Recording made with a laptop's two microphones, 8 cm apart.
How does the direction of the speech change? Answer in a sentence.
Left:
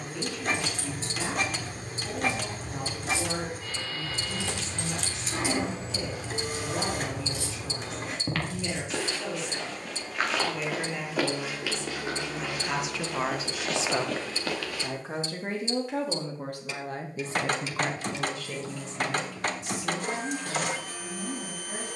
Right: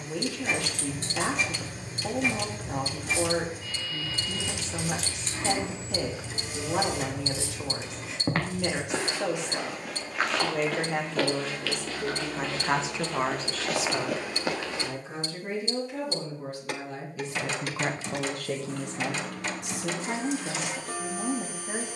You can hear the speech move from right to left and back again.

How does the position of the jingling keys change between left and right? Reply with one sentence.
In this clip you hear the jingling keys go from the right side to the left.